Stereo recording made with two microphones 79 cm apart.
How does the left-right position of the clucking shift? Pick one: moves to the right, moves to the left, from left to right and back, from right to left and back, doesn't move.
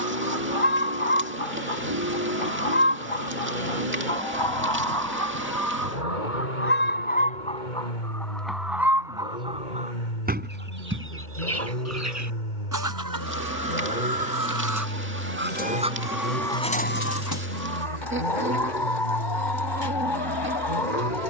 from left to right and back.